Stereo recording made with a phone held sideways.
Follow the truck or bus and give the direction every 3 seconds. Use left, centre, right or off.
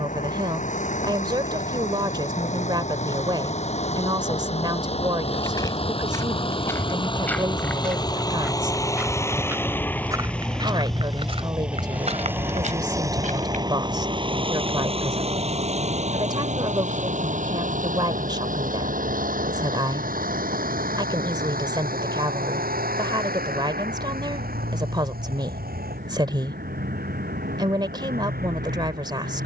left, left, left, centre, right, right, right, right, right, right.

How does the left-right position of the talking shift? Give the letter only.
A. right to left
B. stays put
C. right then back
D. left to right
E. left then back
B.